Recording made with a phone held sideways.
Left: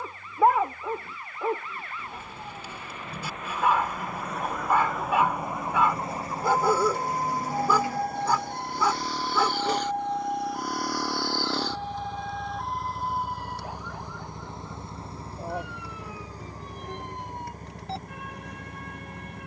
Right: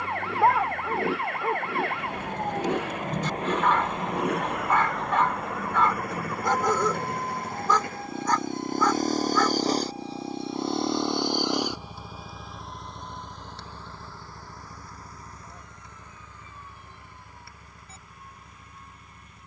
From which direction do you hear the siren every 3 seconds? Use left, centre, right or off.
right, centre, left, left, left, left, left.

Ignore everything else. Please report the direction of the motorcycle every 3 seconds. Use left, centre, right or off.
right, right, right, right, centre, left, left.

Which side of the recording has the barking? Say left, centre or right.
centre.